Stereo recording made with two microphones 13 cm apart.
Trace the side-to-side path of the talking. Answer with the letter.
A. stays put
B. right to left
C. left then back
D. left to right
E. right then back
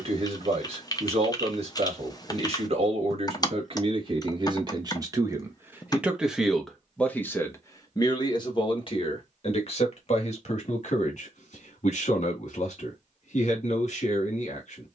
B.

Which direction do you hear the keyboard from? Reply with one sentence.
You can hear the keyboard on the left.